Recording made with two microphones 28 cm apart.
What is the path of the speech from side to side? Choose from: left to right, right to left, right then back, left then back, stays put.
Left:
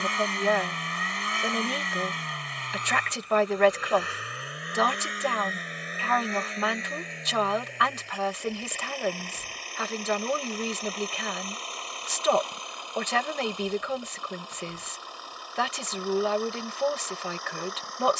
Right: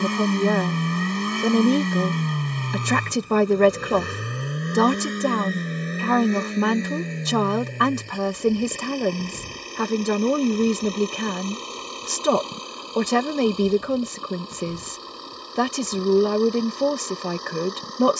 stays put.